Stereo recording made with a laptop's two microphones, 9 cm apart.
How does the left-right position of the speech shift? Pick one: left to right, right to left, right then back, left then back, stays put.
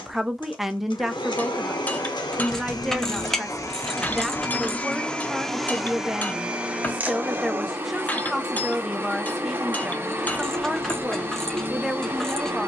stays put.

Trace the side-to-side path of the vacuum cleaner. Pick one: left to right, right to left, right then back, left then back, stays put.
left to right.